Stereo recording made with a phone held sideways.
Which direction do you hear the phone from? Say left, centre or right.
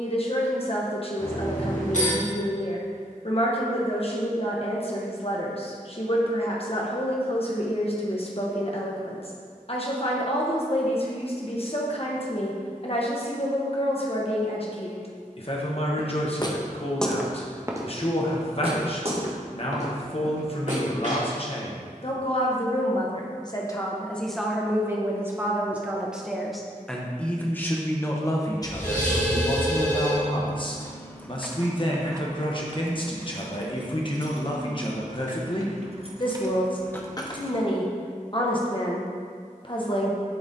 left.